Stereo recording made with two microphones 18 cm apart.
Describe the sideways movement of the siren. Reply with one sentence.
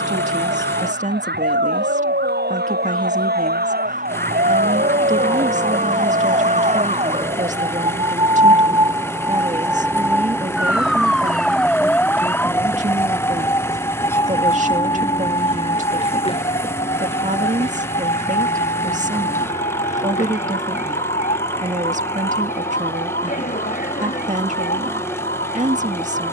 You can hear the siren move from right to left.